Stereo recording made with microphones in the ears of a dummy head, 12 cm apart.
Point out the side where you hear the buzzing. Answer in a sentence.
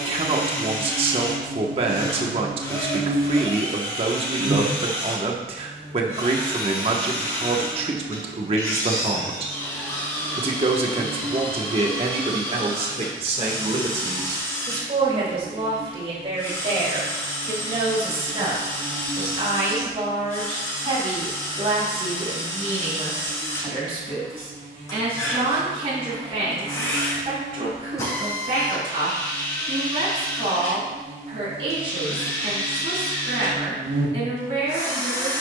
You can hear the buzzing on the right.